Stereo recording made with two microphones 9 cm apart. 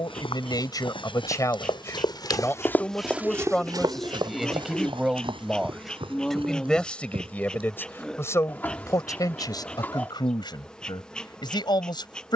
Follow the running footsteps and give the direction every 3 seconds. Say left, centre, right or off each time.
left, right, right, off.